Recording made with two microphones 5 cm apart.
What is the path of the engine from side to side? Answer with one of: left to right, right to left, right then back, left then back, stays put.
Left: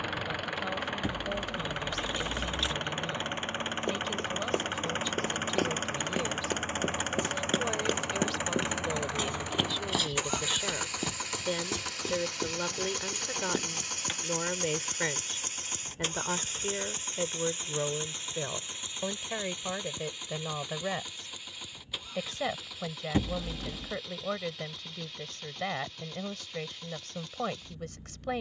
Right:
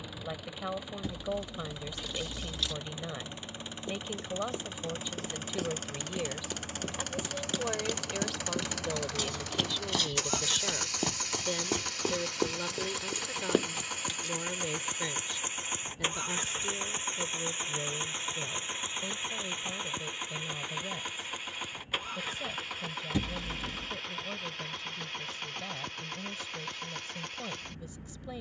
left to right.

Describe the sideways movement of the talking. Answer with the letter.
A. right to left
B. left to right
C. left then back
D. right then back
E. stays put
A.